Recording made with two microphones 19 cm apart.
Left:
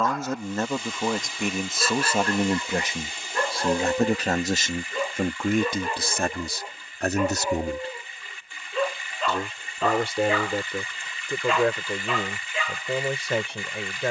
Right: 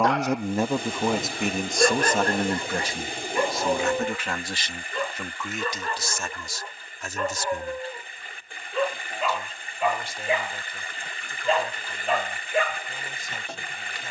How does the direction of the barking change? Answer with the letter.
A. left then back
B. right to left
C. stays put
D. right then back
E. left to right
A.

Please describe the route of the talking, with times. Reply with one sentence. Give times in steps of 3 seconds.
In this clip you hear the talking in the centre from 0 s and on the left from 3 s.